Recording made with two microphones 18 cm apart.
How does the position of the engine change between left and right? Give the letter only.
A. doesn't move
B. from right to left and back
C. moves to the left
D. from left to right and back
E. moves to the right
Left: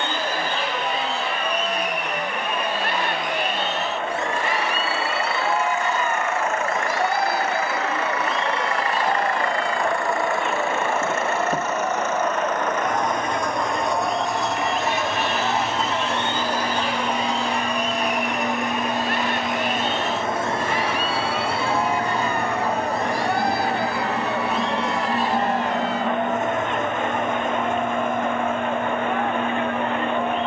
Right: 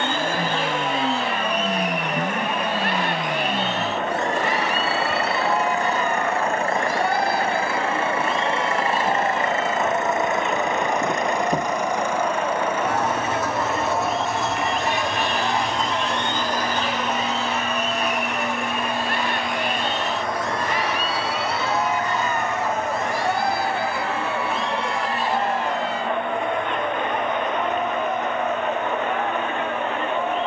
C.